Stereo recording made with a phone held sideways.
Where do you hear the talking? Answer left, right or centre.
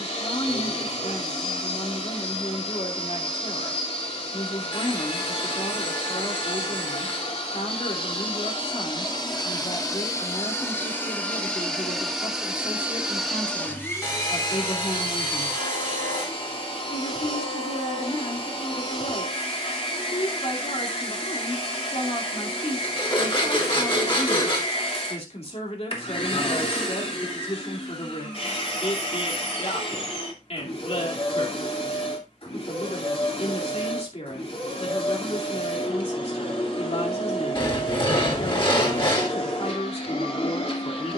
left.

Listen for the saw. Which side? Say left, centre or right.
left.